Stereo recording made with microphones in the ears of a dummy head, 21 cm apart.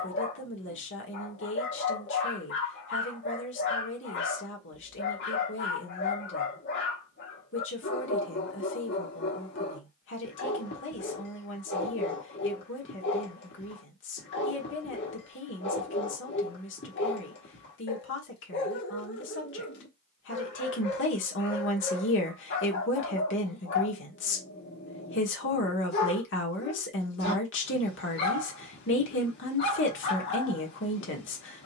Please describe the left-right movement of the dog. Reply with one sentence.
You can hear the dog stay in one place.